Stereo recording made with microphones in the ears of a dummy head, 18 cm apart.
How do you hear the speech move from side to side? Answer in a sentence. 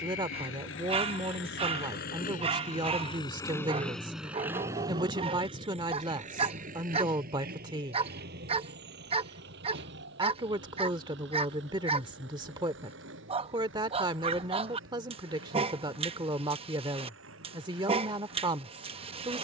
In this clip you hear the speech stay in one place.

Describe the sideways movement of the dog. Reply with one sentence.
In this clip you hear the dog stay put.